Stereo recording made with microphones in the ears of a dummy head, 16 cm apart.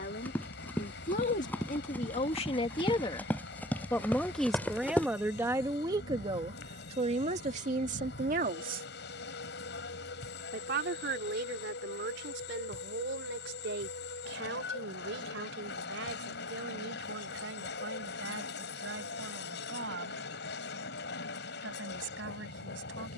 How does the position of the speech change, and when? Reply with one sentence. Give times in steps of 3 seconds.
You can hear the speech on the left from 0 s, in the centre from 3 s and on the right from 6 s.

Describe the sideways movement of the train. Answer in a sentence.
You can hear the train stay put.